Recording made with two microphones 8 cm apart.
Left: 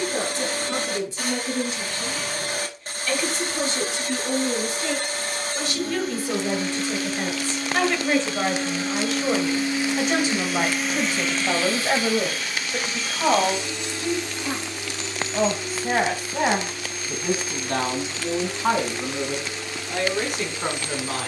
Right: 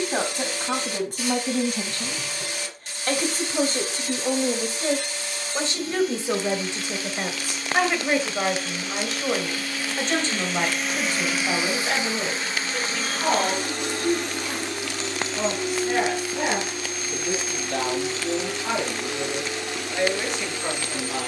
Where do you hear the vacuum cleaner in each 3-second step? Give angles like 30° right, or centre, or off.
50° left, 50° left, 40° left, 10° left, 40° right, 60° right, 70° right.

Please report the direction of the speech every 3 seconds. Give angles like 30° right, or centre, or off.
50° right, 40° right, 10° right, 10° left, 30° left, 40° left, 50° left.